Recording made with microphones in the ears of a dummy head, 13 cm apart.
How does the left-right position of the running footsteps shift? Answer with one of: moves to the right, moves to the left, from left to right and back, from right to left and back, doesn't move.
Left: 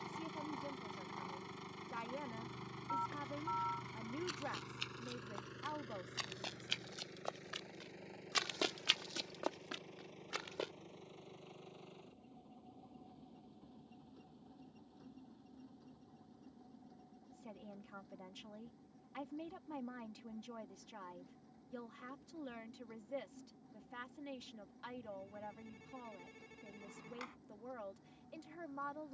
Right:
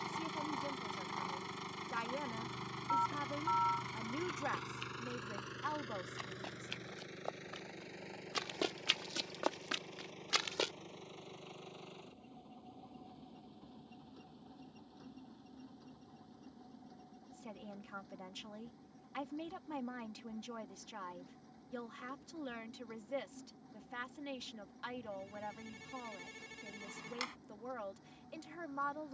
moves to the right.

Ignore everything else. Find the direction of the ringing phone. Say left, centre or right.
right.